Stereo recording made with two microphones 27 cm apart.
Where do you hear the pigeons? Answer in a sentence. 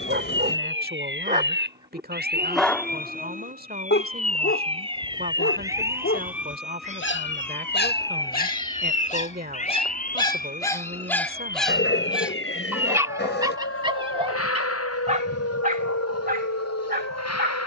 You can hear the pigeons on the left.